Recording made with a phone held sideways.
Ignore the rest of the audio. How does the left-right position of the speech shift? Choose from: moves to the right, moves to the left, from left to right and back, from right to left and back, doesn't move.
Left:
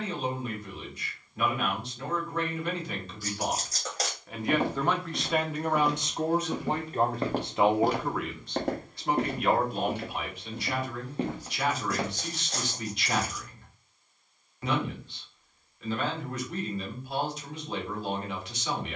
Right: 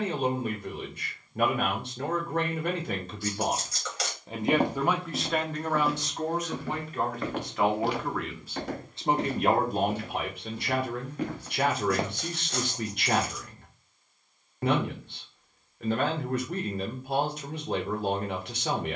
from right to left and back.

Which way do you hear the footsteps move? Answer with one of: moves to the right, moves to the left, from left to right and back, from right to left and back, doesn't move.
from right to left and back.